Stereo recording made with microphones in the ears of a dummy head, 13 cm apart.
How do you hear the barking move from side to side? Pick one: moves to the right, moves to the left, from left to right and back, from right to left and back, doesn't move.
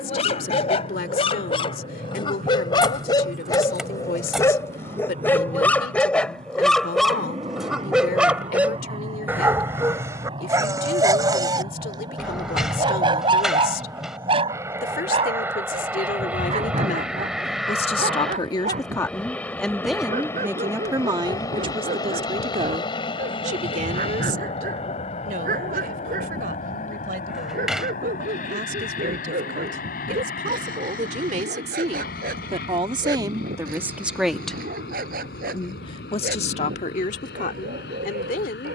moves to the right.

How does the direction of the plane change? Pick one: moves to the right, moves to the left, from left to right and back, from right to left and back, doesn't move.
moves to the left.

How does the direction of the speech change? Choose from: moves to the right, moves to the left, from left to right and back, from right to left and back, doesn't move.
from left to right and back.